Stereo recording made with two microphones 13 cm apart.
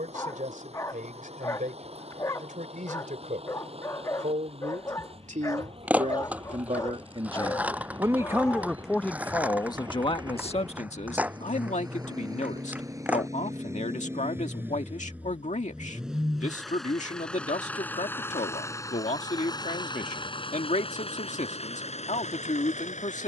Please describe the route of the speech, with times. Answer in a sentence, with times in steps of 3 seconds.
In this clip you hear the speech on the right from 0 s and on the left from 9 s.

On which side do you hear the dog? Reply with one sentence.
You can hear the dog on the left.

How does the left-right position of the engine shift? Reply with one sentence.
You can hear the engine move to the left.